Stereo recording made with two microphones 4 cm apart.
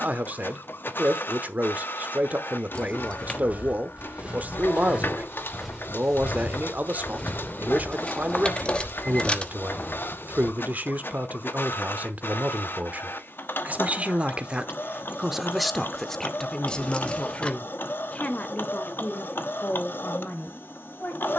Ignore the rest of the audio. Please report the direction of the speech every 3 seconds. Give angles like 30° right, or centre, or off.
40° right, 40° right, 40° right, 40° right, 40° right, 10° left, 40° left.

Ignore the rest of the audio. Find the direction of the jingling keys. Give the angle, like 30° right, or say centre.
20° left.